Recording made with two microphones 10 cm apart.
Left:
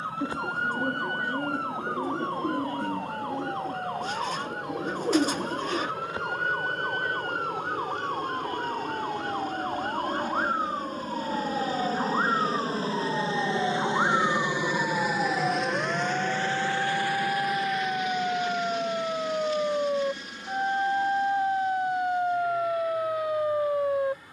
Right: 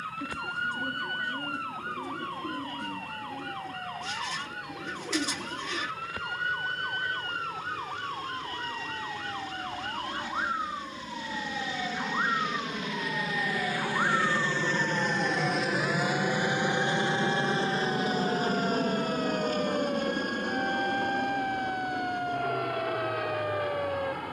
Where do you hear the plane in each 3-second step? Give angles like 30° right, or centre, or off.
80° left, 70° left, 70° left, 60° left, 30° left, 20° right, 50° right, 60° right.